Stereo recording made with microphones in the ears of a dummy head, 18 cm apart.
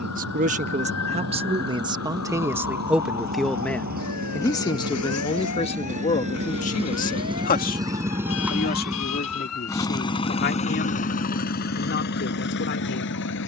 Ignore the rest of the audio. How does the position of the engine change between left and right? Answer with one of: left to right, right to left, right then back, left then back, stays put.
right to left.